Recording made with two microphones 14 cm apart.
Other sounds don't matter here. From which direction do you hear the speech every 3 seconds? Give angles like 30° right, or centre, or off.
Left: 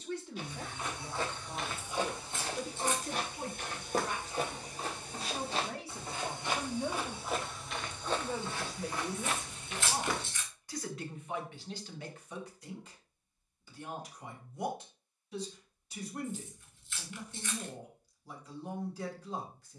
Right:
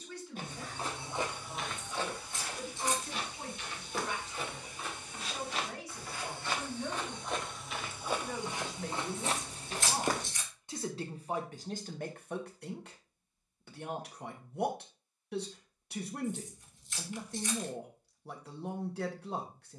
40° left, 40° left, 20° left, 20° right, 60° right, 60° right, 60° right.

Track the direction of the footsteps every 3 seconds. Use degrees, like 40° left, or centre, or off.
centre, 40° left, centre, 40° right, off, off, off.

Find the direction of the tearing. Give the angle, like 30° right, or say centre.
40° right.